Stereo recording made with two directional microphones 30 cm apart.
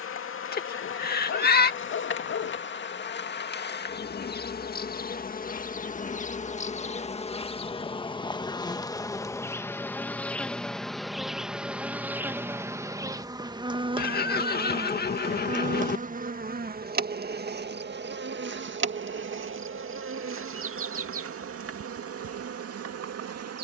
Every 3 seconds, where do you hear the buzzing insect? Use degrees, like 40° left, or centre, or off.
40° left, 30° left, 20° left, centre, 10° right, 30° right, 40° right, 50° right.